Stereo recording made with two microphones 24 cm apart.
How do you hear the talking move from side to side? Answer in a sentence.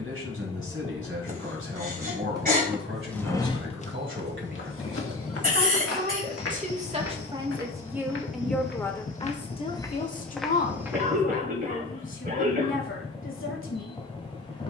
In this clip you hear the talking move from right to left.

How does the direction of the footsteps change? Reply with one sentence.
You can hear the footsteps move from right to left and back again.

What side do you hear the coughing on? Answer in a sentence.
You can hear the coughing on the right.